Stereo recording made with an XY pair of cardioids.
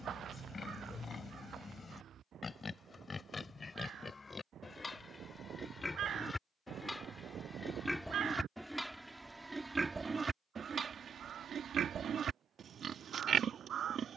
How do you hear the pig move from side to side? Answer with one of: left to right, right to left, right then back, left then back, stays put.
left to right.